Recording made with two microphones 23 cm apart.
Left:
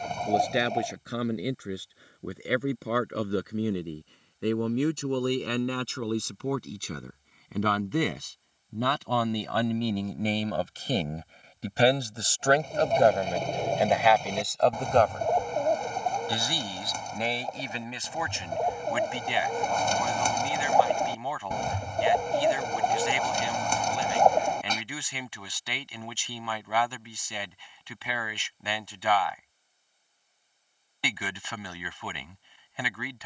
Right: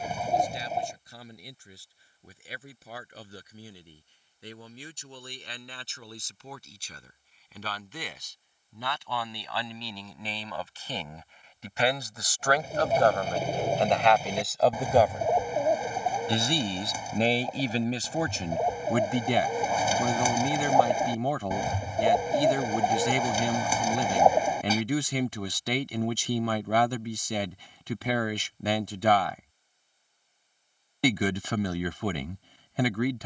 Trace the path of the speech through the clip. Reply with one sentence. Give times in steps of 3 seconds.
In this clip you hear the speech on the left from 0 s, in the centre from 12 s and on the right from 15 s.